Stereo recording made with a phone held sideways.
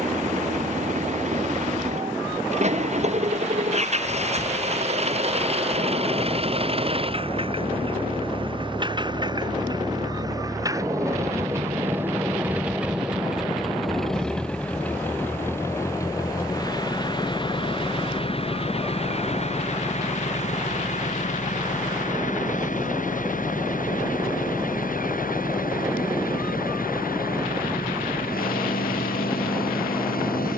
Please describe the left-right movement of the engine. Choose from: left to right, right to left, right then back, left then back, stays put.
right to left.